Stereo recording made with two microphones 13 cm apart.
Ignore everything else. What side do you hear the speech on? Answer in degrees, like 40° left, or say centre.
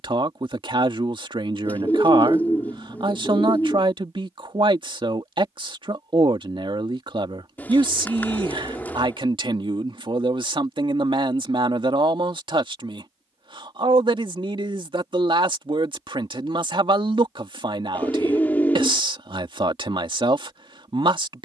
40° right.